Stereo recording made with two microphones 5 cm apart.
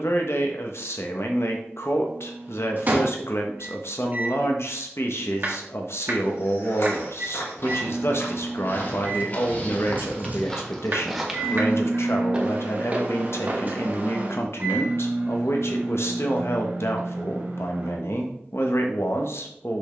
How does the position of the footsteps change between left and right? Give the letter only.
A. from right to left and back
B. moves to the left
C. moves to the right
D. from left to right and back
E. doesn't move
C.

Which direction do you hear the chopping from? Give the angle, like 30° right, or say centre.
50° right.